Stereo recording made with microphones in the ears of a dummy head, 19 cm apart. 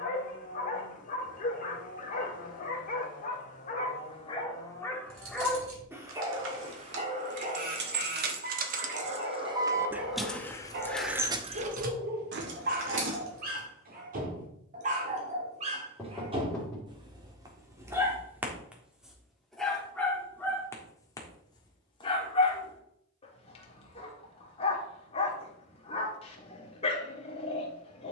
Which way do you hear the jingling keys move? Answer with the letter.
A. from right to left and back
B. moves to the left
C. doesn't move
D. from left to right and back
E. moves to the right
A.